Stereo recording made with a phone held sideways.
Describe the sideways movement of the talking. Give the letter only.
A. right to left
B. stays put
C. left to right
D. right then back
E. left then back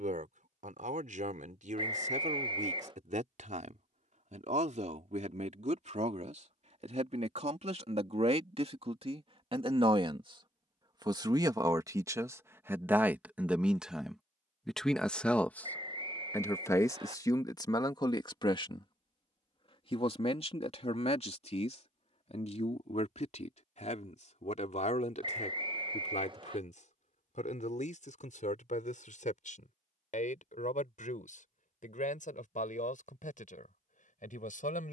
A.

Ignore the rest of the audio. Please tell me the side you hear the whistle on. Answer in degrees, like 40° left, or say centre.
40° right.